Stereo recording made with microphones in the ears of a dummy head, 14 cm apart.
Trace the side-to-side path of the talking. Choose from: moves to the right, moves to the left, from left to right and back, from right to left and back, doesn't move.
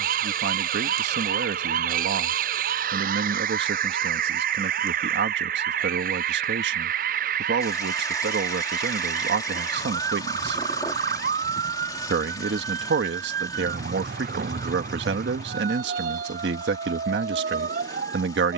doesn't move.